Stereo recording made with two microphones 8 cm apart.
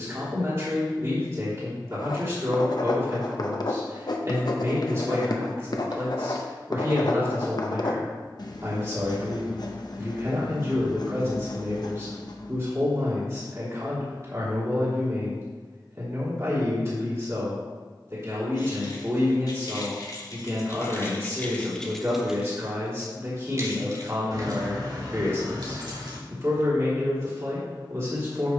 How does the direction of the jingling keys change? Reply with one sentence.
In this clip you hear the jingling keys move to the right.